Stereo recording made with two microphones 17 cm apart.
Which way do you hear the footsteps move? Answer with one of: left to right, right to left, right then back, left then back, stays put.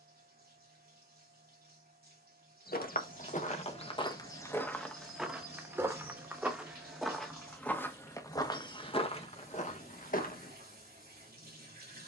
right then back.